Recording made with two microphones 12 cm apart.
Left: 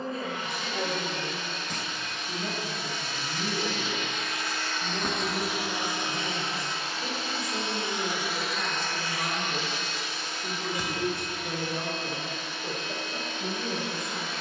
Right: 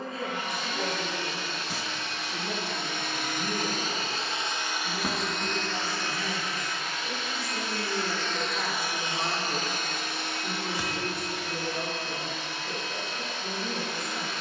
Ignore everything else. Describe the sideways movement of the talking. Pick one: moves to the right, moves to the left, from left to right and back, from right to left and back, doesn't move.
from left to right and back.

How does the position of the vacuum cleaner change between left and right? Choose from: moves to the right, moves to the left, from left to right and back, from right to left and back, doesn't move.
from right to left and back.